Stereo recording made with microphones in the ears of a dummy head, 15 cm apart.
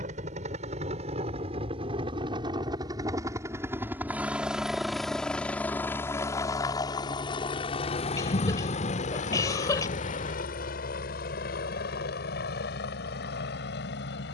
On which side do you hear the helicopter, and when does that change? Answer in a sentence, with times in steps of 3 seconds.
In this clip you hear the helicopter on the right from 0 s, in the centre from 3 s and on the left from 6 s.